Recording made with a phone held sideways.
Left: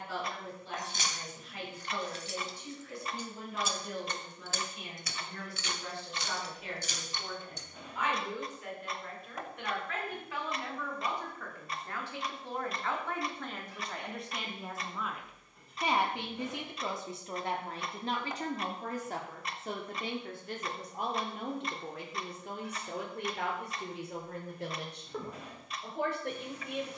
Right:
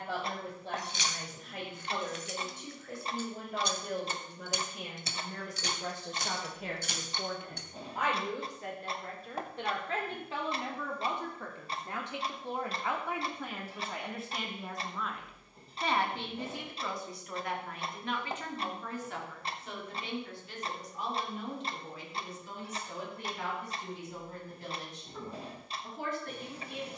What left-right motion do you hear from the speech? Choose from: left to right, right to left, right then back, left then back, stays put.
right to left.